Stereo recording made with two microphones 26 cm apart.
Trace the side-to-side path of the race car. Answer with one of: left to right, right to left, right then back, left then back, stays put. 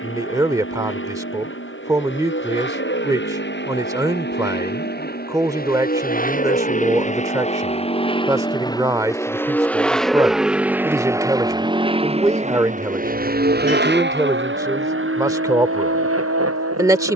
left to right.